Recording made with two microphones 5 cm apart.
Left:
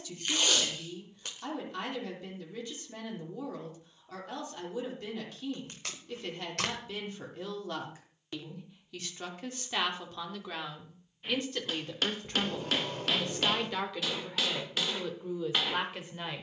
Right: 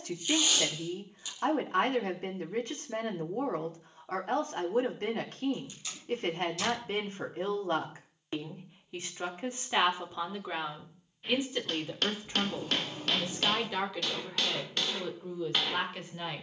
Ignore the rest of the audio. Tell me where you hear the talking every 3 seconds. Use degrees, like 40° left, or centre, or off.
50° right, 50° right, 40° right, 20° right, centre, 10° left.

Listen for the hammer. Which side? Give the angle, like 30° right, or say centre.
centre.